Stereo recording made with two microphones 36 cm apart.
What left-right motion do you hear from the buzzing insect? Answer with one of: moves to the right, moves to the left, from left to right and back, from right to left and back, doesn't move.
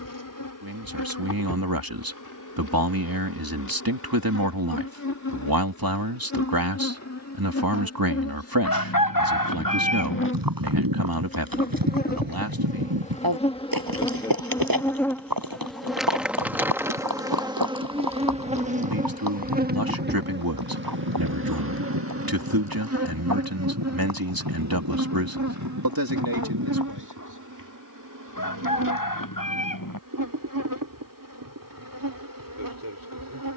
moves to the right.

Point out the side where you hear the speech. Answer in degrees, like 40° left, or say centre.
70° right.